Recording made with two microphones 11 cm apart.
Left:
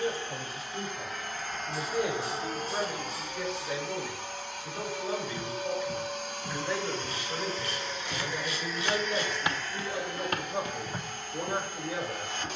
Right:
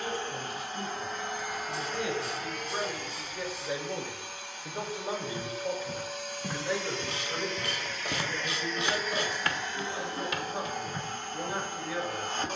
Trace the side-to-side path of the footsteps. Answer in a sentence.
In this clip you hear the footsteps travel towards the left.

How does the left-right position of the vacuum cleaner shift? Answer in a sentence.
You can hear the vacuum cleaner move from right to left and back again.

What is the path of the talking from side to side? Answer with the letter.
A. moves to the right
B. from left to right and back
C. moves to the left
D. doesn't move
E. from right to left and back
B.